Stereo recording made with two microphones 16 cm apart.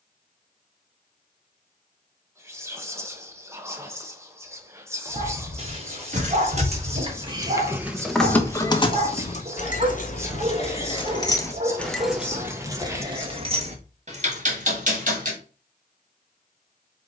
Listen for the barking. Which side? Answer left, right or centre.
right.